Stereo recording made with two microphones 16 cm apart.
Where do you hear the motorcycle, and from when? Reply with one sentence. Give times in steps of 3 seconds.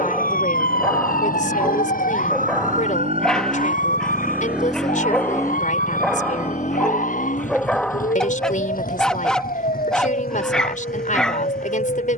In this clip you hear the motorcycle on the right from 0 s, in the centre from 3 s and on the left from 6 s.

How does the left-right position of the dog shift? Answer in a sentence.
In this clip you hear the dog stay put.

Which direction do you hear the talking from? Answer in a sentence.
In this clip you hear the talking on the left.